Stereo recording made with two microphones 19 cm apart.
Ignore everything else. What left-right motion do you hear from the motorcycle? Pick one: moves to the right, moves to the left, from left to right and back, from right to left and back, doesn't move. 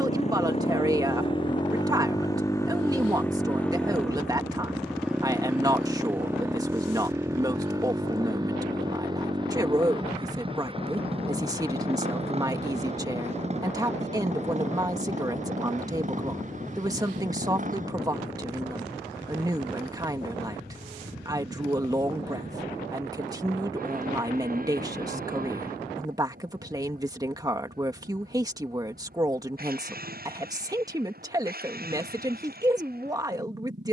moves to the right.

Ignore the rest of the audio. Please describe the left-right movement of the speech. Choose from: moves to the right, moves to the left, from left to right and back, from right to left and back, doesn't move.
doesn't move.